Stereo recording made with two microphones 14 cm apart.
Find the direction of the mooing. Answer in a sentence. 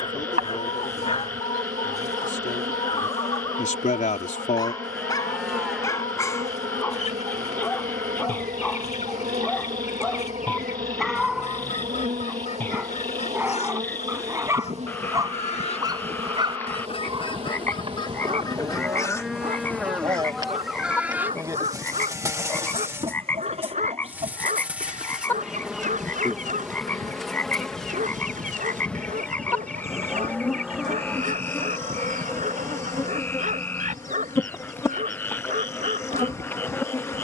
You can hear the mooing in the centre.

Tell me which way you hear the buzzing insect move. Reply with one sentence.
You can hear the buzzing insect travel towards the left.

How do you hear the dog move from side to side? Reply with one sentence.
You can hear the dog go from the left side to the right.